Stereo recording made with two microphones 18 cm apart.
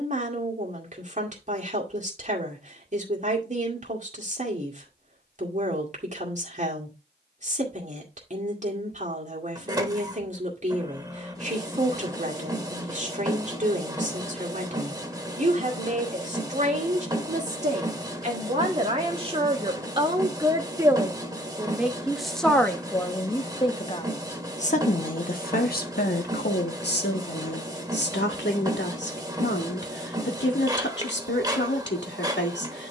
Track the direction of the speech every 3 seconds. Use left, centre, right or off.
right, right, right, right, right, right, right, centre, left, left, left.